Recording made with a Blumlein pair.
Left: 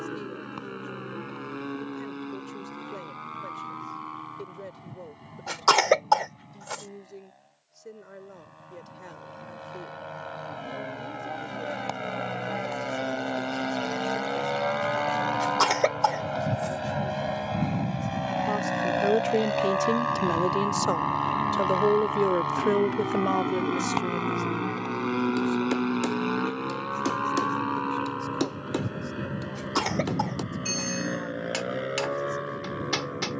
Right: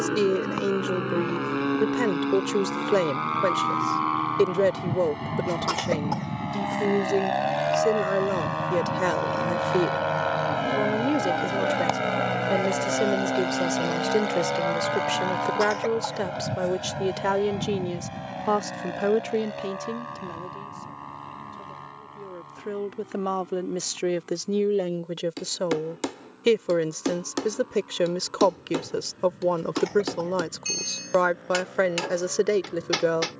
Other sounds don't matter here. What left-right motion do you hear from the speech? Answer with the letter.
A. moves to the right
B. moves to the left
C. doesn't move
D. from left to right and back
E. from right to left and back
E.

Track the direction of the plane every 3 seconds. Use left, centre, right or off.
right, right, right, right, centre, centre, left, left, left, left, left.